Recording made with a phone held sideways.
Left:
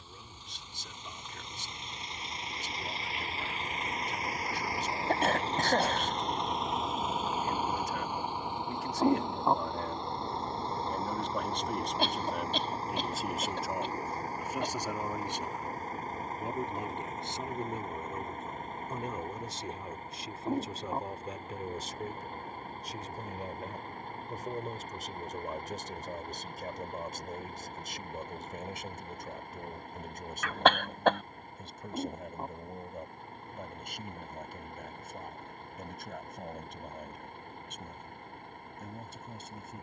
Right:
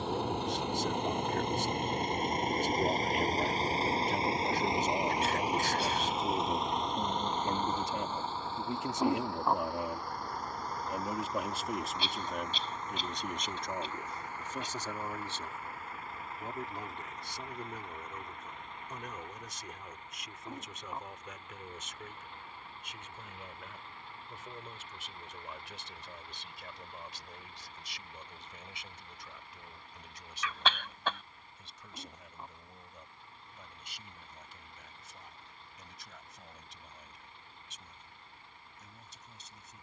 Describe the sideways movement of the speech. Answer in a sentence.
In this clip you hear the speech travel towards the left.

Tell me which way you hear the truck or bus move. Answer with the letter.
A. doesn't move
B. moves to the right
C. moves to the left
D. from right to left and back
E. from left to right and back
C.